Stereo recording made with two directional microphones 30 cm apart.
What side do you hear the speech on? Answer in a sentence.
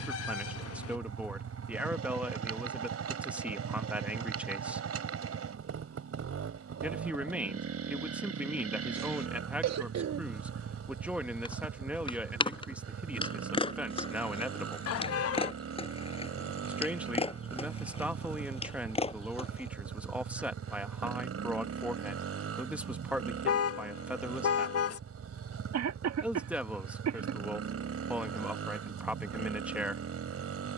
In this clip you hear the speech in the centre.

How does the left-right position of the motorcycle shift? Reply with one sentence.
You can hear the motorcycle stay put.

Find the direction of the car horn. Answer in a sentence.
You can hear the car horn on the left.